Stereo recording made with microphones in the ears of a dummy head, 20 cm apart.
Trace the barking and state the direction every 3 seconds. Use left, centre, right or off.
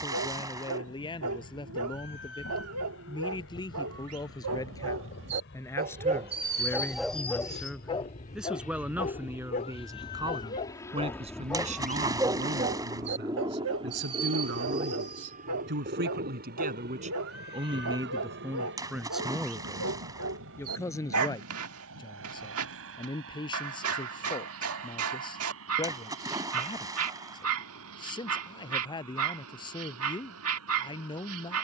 right, right, centre, left, right, right, right, right, right, right, right.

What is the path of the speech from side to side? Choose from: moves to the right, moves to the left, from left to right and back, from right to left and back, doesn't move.
from left to right and back.